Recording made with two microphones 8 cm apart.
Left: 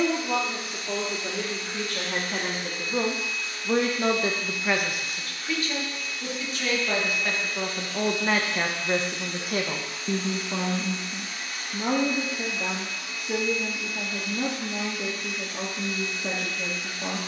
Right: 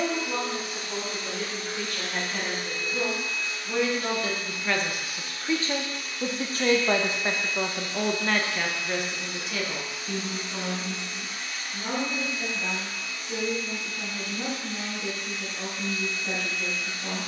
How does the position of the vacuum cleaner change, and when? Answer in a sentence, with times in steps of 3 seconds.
You can hear the vacuum cleaner on the right from 0 s and in the centre from 9 s.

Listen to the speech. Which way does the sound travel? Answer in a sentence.
You can hear the speech move from left to right and back again.